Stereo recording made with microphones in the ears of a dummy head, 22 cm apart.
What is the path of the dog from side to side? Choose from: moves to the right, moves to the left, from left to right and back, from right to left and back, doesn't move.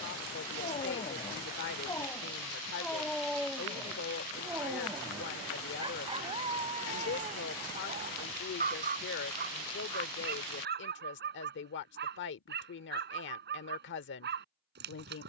moves to the right.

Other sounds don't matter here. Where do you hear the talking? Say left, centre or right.
left.